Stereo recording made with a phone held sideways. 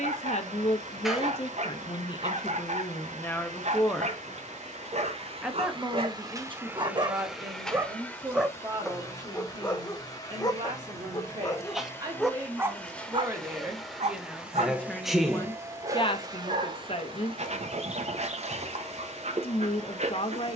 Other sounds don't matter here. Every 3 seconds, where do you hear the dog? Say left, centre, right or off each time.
right, right, right, left, right, right, right.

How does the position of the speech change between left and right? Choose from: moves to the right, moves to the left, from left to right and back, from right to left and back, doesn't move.
from left to right and back.